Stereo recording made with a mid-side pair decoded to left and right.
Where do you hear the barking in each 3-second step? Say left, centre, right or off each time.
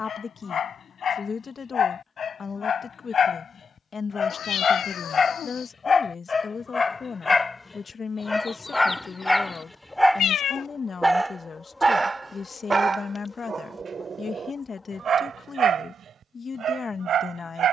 left, left, left, centre, right, right.